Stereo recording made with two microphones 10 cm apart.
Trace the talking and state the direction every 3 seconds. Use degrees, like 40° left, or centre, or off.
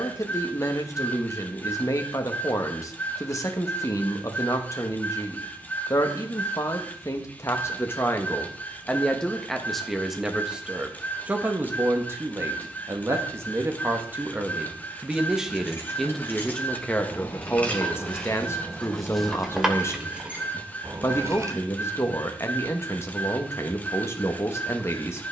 30° left, 30° left, 30° left, 10° right, 20° right, 10° left, 30° left, 30° left, 30° left.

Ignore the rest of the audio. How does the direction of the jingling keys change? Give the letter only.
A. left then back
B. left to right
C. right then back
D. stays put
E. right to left
B.